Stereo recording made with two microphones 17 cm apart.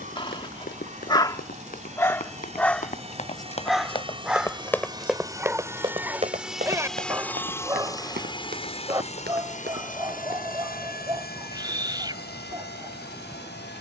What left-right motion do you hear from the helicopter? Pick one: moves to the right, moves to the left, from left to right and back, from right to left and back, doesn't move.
moves to the left.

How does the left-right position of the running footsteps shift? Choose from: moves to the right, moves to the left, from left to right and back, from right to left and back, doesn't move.
moves to the right.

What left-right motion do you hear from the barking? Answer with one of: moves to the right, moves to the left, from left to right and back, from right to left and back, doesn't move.
moves to the right.